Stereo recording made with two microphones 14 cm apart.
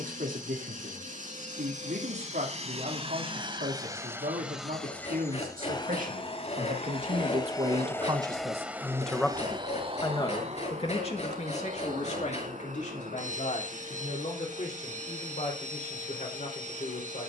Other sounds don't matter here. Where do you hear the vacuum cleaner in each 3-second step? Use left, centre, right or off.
right, centre, left, right, right, right.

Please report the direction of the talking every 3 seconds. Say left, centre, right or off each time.
right, right, right, left, left, left.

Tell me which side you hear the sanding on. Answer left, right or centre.
left.